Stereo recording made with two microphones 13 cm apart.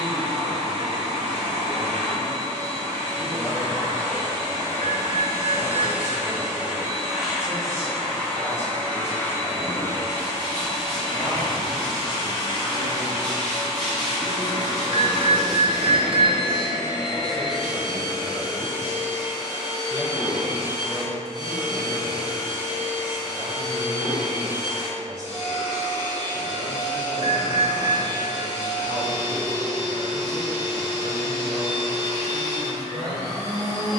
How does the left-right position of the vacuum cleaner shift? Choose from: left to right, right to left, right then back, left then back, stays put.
right to left.